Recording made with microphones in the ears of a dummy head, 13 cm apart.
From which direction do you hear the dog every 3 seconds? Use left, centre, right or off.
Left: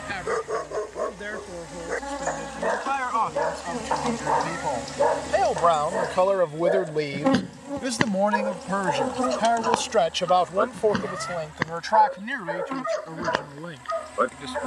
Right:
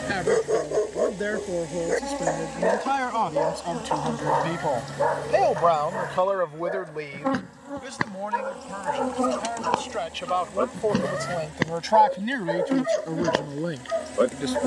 right, centre, left, centre, right.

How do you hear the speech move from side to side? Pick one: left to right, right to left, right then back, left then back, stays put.
left then back.